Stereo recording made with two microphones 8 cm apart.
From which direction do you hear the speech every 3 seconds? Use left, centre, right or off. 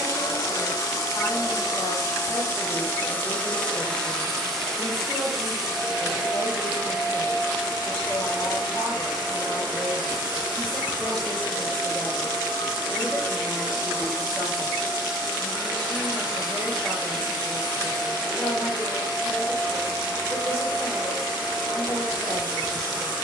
left, left, left, centre, centre, centre, left, left.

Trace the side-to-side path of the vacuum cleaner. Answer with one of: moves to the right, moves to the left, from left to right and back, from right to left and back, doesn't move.
moves to the right.